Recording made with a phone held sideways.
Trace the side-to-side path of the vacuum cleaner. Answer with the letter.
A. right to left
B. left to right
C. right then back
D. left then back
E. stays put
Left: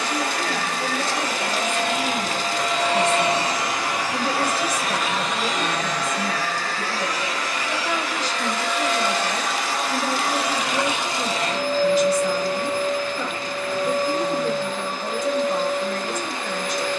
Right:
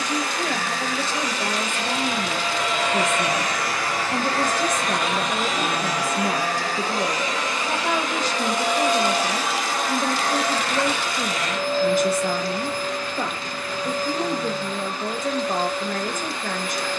C.